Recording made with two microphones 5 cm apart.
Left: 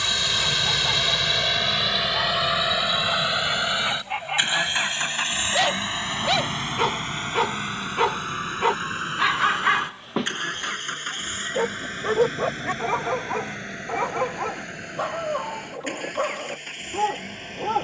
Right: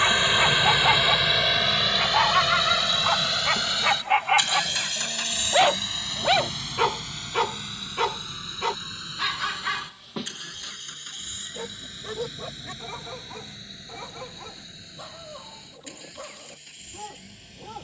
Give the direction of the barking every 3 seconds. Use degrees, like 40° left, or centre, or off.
50° right, 30° right, 10° left, 40° left, 60° left, 70° left.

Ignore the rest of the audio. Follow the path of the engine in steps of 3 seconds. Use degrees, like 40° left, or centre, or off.
centre, 30° left, 40° left, 50° left, 60° left, 60° left.